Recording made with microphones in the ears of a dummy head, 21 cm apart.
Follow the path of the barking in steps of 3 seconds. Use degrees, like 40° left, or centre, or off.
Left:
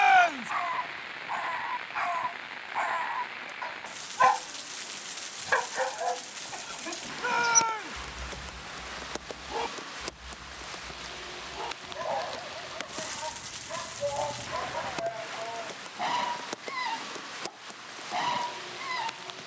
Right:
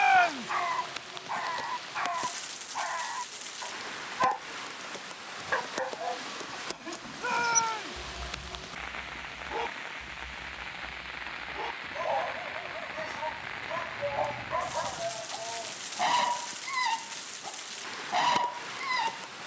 centre, 30° left, 20° left, centre, 10° right, 20° right, 20° right.